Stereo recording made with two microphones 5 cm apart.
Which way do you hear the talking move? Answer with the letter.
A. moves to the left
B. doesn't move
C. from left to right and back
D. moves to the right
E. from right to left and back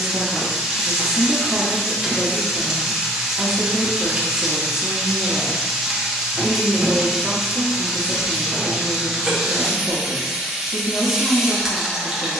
B.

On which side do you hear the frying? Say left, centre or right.
centre.